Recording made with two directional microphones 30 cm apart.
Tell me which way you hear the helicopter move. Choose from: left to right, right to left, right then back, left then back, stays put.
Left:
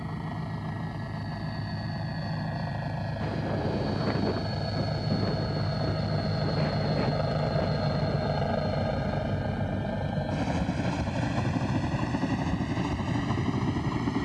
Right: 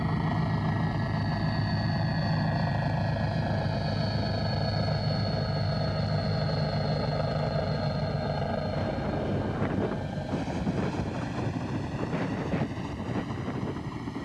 right to left.